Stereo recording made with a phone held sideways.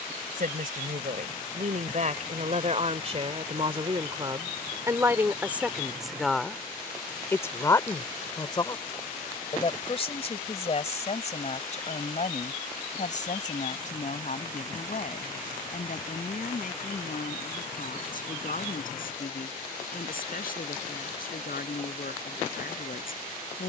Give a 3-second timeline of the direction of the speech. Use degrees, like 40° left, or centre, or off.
50° right, 20° right, 20° left, 40° left, 50° left, 60° left, 60° left, 70° left.